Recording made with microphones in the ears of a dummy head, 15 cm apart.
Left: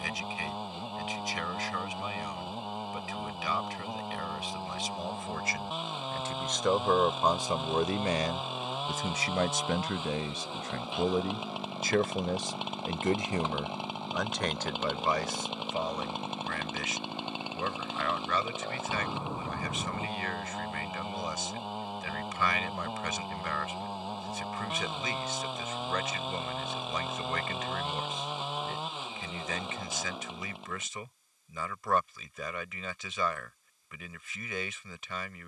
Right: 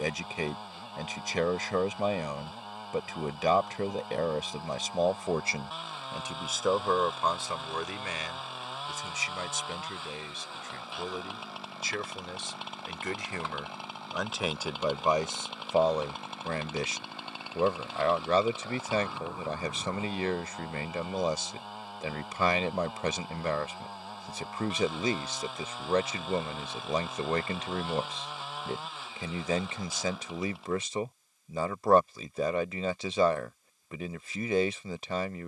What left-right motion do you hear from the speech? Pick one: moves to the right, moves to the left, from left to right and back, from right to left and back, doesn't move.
from right to left and back.